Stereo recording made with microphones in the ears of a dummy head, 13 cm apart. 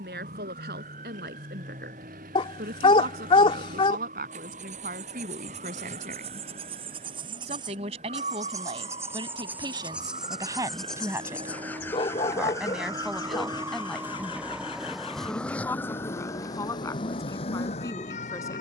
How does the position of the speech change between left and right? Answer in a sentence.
You can hear the speech go from the right side to the left.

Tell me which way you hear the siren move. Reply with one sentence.
In this clip you hear the siren travel towards the left.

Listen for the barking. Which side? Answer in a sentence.
You can hear the barking on the left.